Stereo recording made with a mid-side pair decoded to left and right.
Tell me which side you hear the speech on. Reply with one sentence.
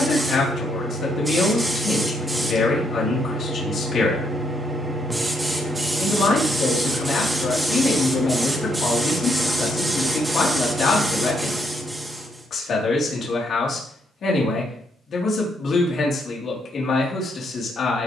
In this clip you hear the speech on the left.